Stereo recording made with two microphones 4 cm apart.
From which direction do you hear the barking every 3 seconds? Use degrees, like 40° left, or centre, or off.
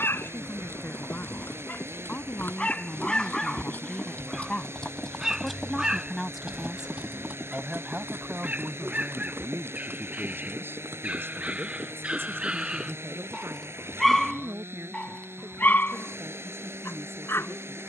50° left, centre, 30° right, 40° right, 10° right, 50° left.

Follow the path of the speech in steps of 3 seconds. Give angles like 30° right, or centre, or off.
50° left, 20° left, 20° right, 60° right, 70° right, 80° right.